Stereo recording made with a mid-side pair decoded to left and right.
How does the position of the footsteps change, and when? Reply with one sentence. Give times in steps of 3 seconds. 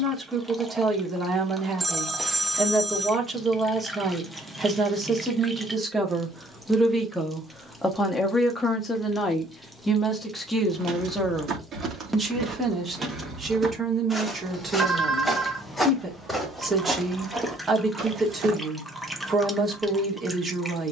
In this clip you hear the footsteps not at all from 0 s, on the right from 9 s, in the centre from 12 s and on the right from 18 s.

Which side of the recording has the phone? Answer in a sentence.
In this clip you hear the phone in the centre.